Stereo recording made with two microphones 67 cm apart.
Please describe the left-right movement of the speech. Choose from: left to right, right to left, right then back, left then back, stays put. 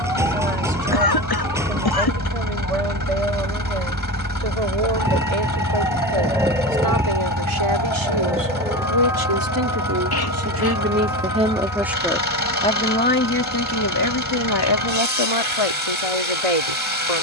right to left.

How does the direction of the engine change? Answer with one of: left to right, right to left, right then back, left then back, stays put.
stays put.